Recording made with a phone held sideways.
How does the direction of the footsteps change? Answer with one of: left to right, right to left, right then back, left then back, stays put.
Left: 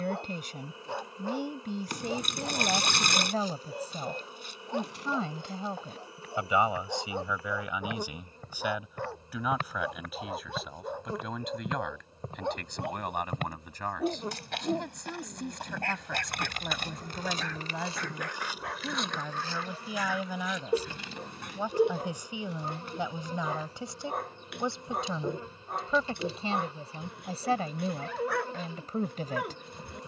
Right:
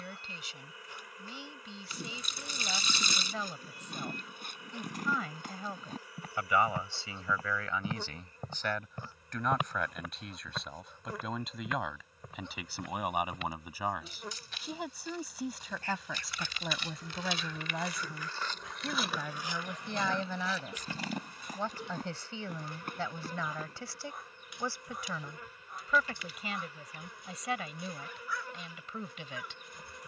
left then back.